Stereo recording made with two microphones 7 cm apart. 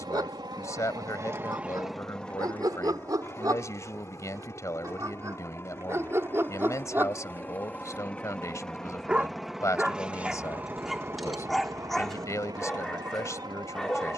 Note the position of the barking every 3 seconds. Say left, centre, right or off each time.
right, right, right, centre, centre.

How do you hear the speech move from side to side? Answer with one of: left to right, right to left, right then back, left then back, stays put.
stays put.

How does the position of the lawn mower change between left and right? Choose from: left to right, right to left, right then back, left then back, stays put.
left then back.